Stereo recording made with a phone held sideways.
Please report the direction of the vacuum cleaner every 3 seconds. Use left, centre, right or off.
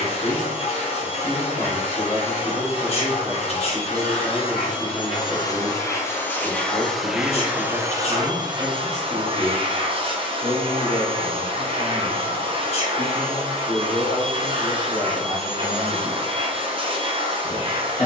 left, left, centre, right, right, right.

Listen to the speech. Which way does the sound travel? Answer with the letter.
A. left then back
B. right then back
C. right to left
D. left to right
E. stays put
B.